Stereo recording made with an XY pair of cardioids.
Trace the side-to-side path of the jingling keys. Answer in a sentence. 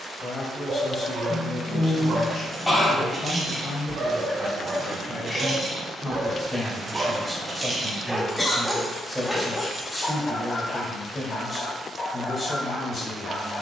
In this clip you hear the jingling keys move from left to right and back again.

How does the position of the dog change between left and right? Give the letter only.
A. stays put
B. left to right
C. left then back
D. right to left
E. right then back
D.